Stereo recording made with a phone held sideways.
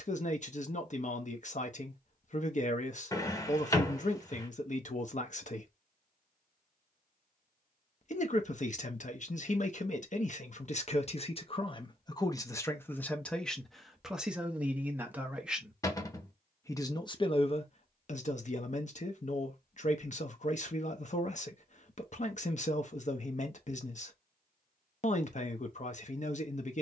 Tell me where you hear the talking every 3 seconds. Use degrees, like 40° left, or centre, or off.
50° left, 50° left, 50° left, 40° left, 10° left, 20° left, 50° left, 50° left, 50° left.